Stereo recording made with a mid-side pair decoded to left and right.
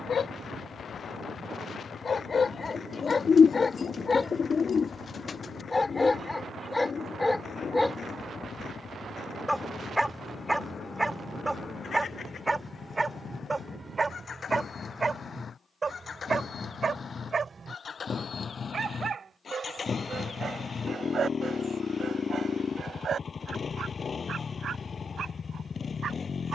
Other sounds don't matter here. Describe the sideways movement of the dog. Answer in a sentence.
You can hear the dog move to the right.